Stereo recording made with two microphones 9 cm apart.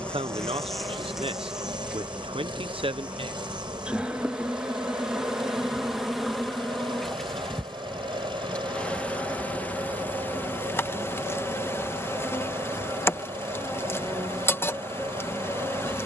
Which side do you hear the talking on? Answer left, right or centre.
right.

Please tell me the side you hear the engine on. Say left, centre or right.
right.